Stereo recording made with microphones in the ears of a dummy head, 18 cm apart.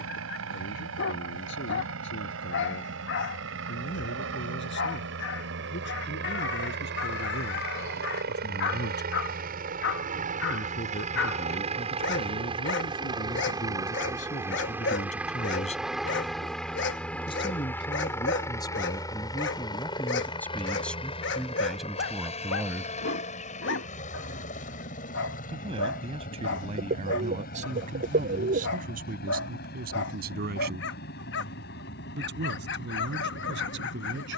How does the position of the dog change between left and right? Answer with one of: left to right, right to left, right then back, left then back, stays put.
stays put.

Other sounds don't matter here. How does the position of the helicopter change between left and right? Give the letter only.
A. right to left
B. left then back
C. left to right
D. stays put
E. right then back
A.